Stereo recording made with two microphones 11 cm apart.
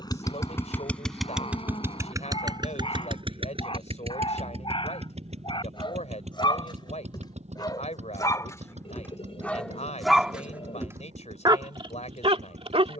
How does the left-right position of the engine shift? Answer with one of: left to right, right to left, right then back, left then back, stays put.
left to right.